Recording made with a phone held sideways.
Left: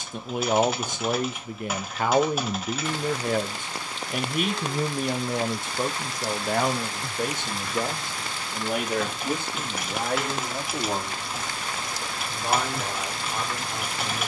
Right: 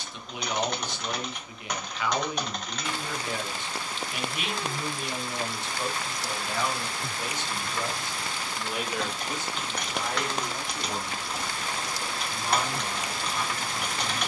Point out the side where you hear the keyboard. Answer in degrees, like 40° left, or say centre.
centre.